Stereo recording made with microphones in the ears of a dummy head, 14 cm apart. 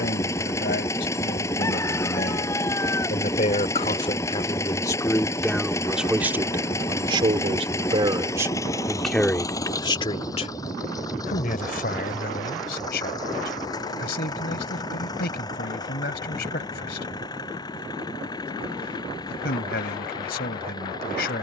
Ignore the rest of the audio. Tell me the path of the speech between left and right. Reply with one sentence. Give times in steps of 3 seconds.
You can hear the speech on the left from 0 s, on the right from 6 s and on the left from 9 s.